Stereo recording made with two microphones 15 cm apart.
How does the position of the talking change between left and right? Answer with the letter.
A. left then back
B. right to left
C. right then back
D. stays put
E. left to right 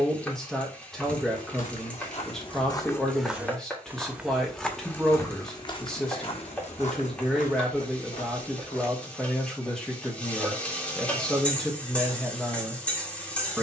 D.